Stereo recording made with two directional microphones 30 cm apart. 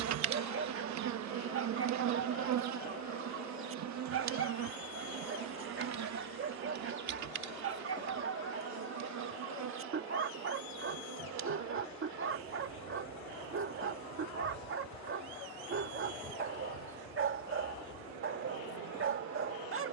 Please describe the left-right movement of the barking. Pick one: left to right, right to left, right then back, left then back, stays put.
stays put.